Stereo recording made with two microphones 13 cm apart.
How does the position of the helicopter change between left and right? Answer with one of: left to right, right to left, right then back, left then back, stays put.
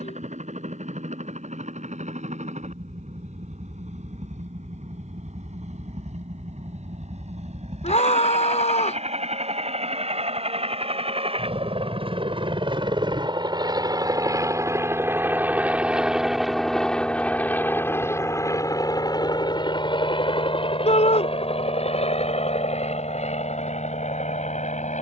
right to left.